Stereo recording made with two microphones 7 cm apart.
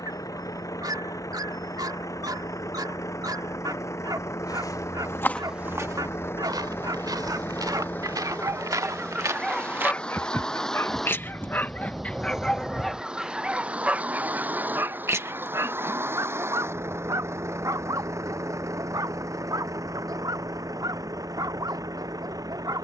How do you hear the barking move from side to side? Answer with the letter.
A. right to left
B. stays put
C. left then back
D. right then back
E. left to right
C.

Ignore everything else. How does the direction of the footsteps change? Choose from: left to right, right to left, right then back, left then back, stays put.
right then back.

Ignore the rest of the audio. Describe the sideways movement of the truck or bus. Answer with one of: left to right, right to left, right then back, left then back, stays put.
left to right.